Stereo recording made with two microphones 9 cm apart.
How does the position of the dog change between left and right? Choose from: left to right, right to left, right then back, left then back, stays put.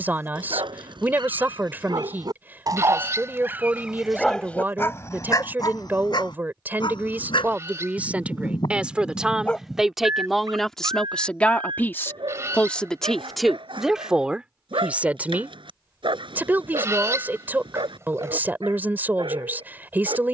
left then back.